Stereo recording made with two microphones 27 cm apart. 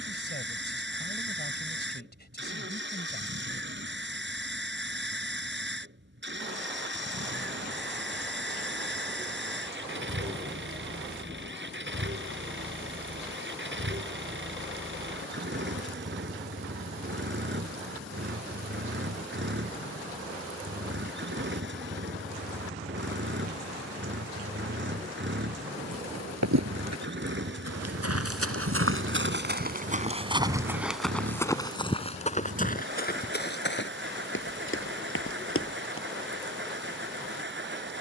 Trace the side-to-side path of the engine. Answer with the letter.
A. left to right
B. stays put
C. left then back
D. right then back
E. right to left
B.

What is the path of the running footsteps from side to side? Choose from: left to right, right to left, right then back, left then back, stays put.
right to left.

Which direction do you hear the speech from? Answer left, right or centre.
left.